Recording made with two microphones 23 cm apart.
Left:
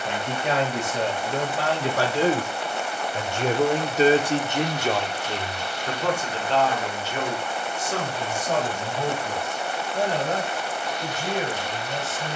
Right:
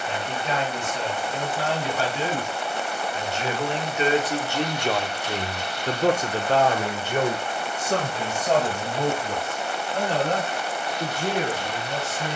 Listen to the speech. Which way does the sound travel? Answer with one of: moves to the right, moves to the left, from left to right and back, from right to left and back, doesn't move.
moves to the right.